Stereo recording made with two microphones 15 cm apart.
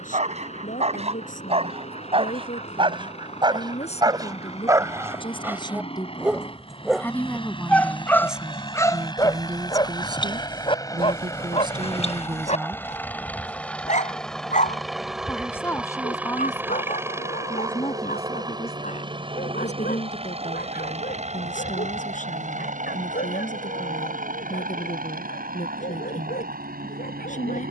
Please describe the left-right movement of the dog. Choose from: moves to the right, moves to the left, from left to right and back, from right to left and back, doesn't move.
moves to the left.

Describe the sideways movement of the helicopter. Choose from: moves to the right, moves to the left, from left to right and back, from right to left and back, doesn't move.
moves to the right.